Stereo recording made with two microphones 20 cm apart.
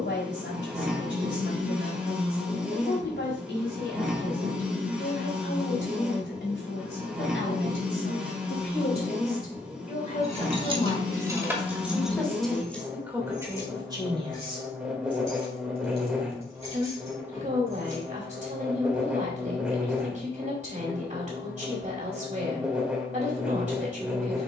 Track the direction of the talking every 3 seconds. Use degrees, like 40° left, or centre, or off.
70° left, 70° left, 60° left, 30° left, 10° right, 40° right, 40° right, 40° right.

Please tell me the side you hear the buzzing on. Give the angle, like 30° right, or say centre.
centre.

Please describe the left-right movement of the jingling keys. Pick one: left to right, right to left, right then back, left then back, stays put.
right to left.